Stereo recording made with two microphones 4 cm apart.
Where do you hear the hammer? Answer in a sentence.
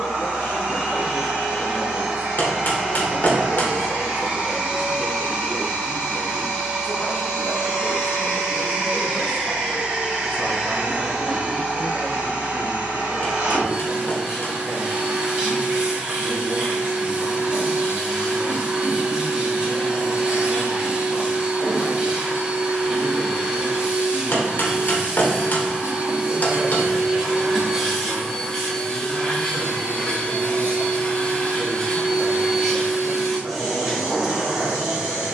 You can hear the hammer on the left.